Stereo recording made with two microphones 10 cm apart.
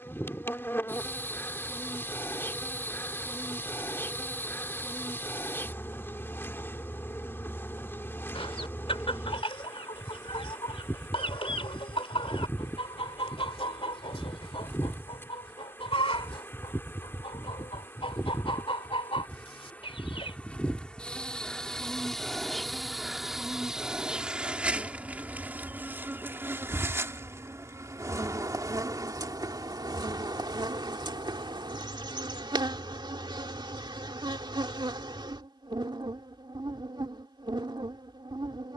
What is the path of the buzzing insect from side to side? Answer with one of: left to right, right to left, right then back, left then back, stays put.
left to right.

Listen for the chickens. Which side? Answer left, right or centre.
left.